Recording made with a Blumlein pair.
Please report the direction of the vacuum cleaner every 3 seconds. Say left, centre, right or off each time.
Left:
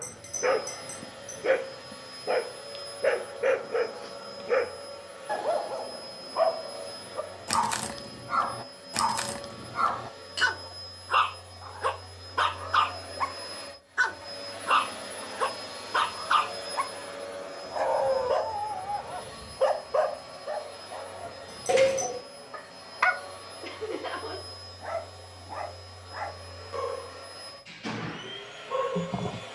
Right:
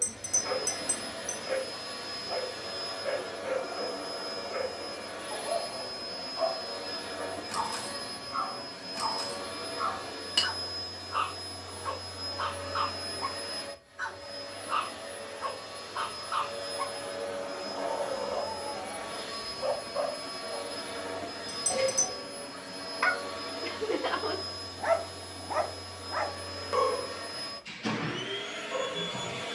right, right, right, right, centre, centre, right, right, right, right.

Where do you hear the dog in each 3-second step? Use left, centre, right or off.
left, left, left, left, left, left, left, left, right, centre.